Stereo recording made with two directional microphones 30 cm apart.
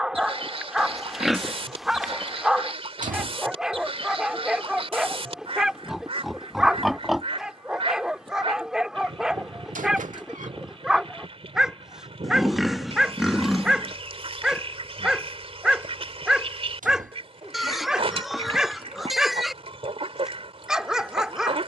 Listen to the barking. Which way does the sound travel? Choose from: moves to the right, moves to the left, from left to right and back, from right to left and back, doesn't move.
doesn't move.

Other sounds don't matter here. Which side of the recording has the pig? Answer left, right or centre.
centre.